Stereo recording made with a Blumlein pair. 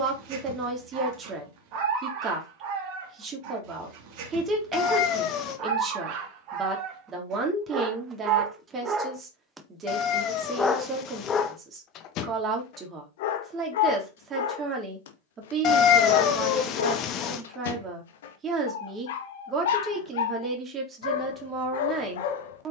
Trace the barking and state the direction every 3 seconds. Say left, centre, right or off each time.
right, right, right, centre, left, left, left, left.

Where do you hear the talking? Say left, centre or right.
right.